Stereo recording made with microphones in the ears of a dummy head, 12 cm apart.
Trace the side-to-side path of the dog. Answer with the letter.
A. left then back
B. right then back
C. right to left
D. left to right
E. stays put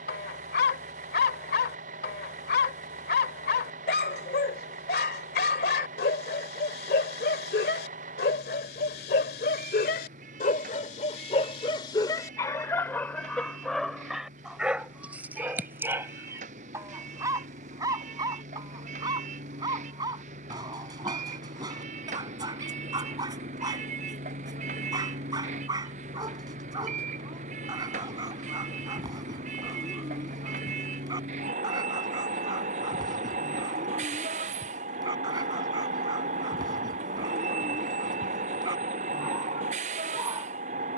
D.